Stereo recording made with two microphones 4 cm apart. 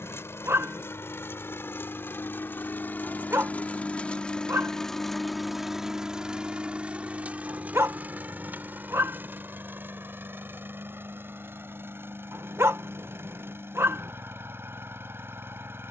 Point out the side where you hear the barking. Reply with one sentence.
In this clip you hear the barking on the right.